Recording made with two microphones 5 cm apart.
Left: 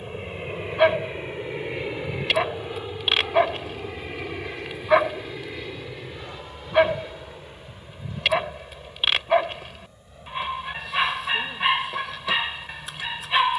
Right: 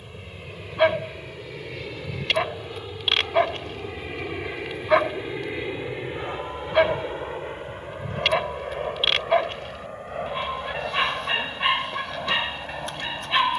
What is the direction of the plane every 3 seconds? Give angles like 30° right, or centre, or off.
30° left, 10° right, 40° right, 60° right, 70° right.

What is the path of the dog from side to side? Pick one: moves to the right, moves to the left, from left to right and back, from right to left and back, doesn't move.
doesn't move.